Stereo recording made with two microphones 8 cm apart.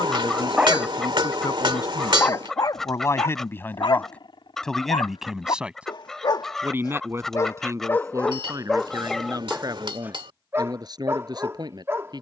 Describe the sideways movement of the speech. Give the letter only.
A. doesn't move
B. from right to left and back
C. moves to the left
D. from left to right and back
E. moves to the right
E.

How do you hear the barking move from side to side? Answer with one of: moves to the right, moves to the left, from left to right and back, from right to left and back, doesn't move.
from right to left and back.